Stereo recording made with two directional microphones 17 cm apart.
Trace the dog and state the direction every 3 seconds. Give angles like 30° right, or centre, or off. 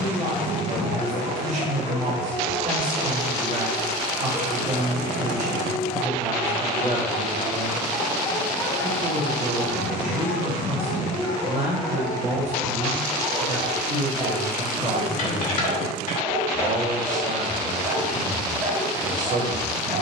30° right, 20° right, centre, 20° left, centre, 20° right, 20° right.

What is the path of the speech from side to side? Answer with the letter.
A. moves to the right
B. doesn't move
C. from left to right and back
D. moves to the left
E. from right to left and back
B.